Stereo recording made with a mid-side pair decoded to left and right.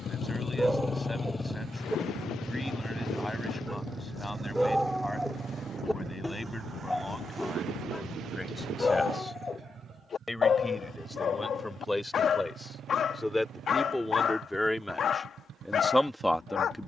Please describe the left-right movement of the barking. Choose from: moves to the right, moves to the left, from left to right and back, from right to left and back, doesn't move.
moves to the left.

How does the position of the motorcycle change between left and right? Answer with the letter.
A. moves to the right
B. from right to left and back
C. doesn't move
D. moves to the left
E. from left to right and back
A.